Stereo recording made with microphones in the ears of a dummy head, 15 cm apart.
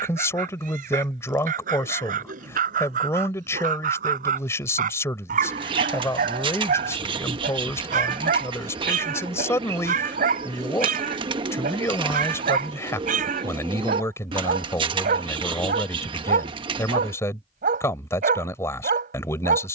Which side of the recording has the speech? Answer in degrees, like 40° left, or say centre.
20° left.